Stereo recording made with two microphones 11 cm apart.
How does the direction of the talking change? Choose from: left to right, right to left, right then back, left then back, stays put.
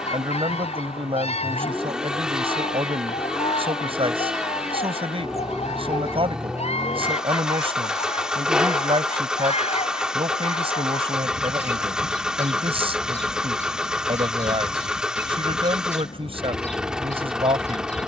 stays put.